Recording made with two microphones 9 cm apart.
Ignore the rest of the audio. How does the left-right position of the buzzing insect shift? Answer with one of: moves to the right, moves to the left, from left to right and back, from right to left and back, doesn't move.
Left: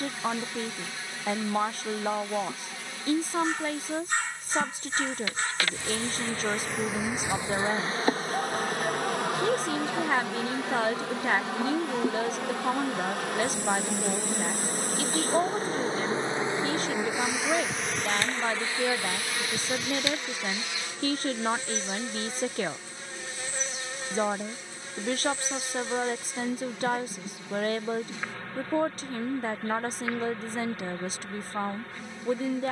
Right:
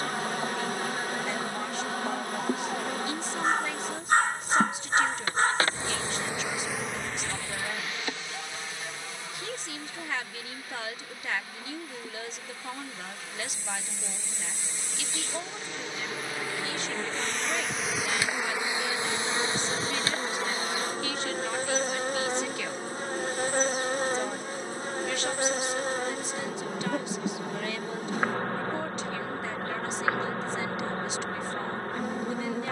from right to left and back.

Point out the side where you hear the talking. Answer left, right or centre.
left.